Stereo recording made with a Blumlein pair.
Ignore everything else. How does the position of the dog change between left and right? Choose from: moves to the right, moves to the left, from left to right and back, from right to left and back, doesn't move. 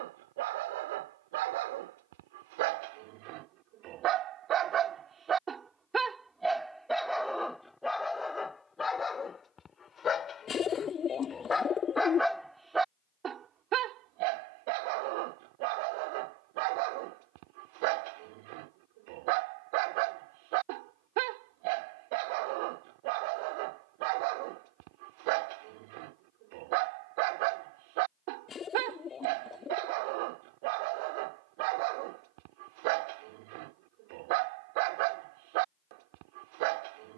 from right to left and back.